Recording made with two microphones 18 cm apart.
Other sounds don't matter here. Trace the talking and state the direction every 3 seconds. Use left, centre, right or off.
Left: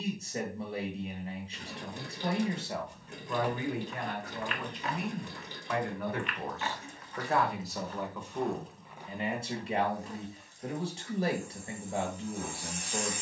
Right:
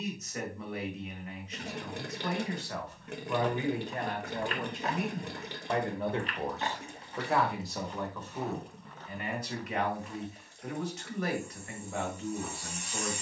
left, right, centre, left, left.